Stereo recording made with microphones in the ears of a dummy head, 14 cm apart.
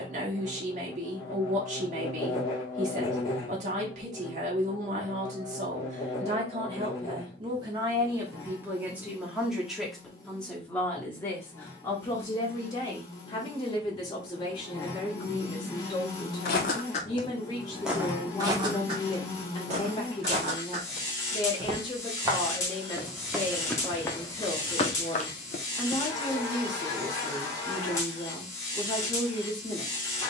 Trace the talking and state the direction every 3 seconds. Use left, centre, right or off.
right, right, right, centre, left, left, left, left, left, left.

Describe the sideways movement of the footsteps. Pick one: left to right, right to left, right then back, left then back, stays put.
right then back.